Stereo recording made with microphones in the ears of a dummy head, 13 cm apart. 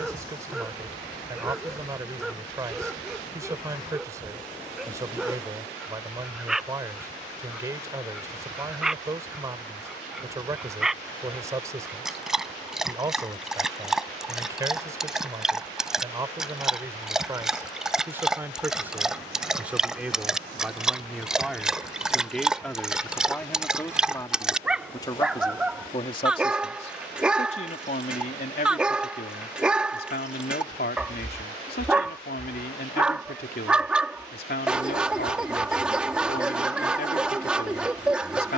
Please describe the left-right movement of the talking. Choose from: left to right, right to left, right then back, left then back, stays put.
right to left.